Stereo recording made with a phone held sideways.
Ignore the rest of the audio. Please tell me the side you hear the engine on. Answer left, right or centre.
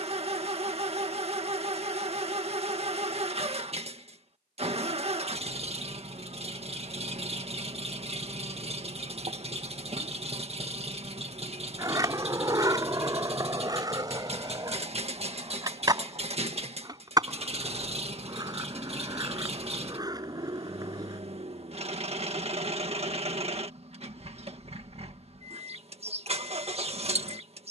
right.